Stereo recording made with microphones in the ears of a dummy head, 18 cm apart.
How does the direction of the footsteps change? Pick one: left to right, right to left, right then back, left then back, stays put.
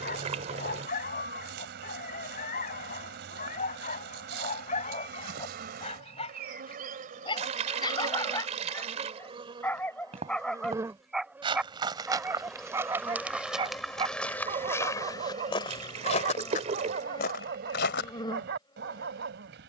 right to left.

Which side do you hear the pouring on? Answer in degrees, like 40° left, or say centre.
30° right.